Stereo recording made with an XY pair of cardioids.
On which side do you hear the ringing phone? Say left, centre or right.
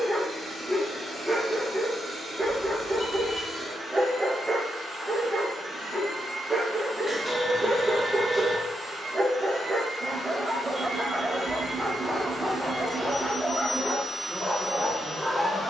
centre.